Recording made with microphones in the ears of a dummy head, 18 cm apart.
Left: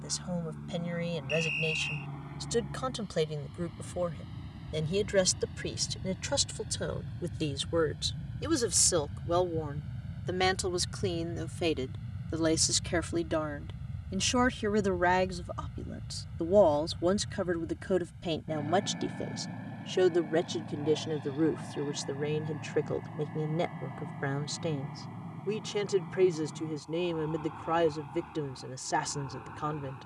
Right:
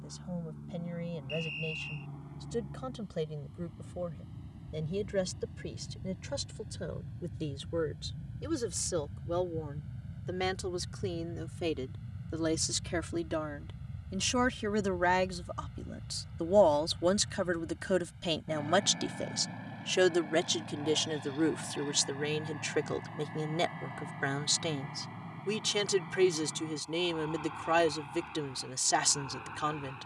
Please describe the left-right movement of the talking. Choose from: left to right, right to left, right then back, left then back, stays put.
left to right.